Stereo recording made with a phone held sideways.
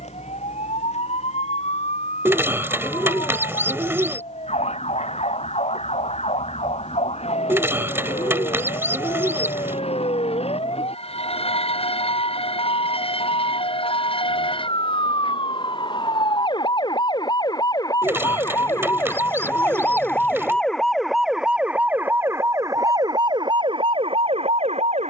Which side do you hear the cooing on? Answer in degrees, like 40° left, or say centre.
20° right.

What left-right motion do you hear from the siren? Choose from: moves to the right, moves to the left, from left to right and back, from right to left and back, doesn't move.
moves to the right.